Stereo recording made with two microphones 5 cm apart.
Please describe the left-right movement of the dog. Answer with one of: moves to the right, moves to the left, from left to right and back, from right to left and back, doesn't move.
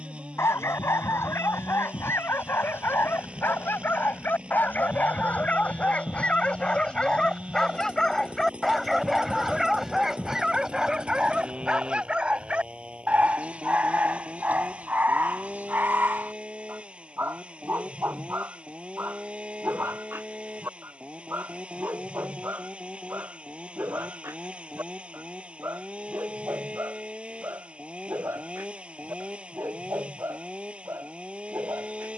moves to the right.